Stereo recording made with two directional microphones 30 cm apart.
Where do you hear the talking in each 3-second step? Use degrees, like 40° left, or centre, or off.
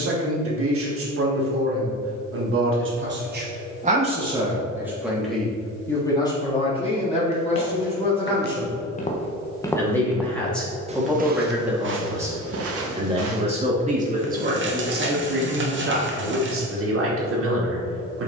50° right, 10° right, 20° left, centre, 20° right, 40° right.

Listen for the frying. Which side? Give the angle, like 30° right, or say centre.
40° right.